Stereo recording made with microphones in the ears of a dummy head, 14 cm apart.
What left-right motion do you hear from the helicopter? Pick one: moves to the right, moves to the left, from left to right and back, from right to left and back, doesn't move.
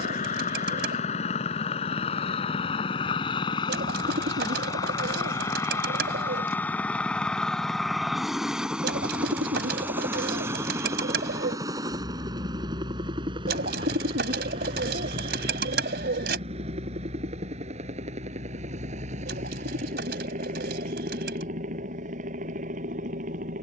moves to the right.